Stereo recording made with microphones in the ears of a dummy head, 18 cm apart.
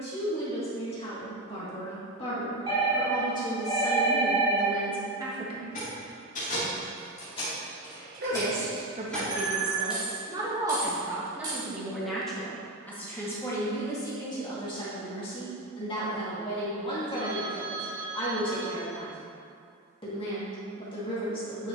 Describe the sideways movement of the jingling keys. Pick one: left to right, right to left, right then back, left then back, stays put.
left to right.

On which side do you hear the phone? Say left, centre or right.
right.